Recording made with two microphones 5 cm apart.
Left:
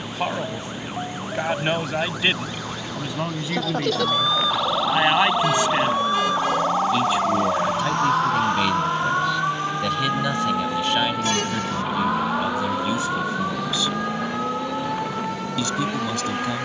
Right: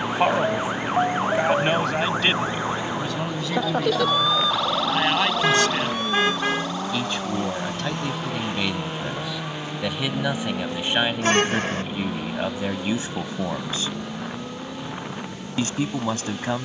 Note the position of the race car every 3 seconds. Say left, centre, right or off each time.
right, right, right, centre, left, left.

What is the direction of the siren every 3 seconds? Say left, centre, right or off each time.
right, centre, left, left, left, left.